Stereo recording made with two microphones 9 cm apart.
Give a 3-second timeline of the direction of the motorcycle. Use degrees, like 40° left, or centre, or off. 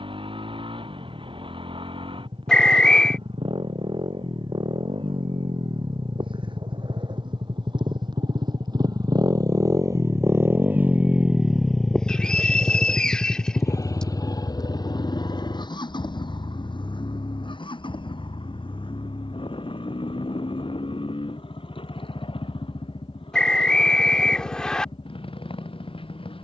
80° right, 70° right, 60° right, 20° right, 30° left, 60° left, 70° left, 70° left, 80° left.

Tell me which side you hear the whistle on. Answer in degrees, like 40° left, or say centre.
10° left.